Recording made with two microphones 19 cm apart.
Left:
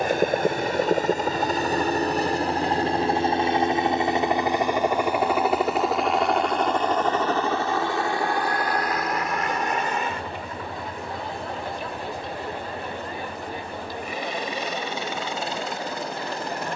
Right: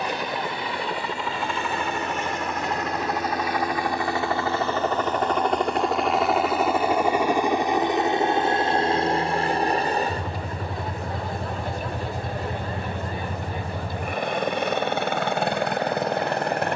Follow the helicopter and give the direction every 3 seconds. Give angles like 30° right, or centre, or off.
40° left, 20° left, 10° right, 40° right, 50° right, 60° right.